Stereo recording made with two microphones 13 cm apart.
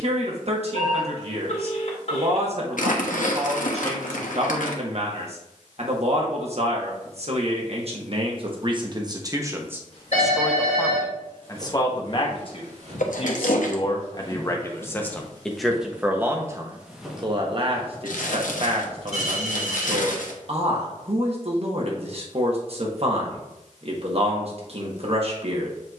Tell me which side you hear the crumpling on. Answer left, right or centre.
left.